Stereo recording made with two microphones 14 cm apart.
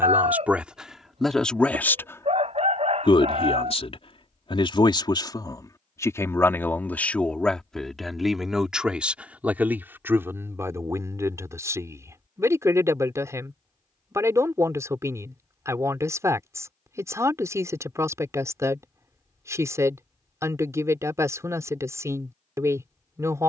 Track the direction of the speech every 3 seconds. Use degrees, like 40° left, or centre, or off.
centre, 40° left, 10° left, 20° right, 20° right, 20° right, 20° right, 20° right.